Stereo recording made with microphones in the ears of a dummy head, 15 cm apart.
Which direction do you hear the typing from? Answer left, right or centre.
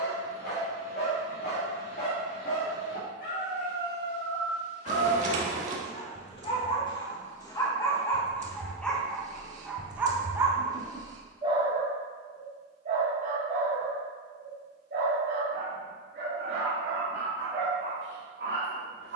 right.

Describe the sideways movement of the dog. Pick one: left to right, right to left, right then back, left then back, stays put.
left to right.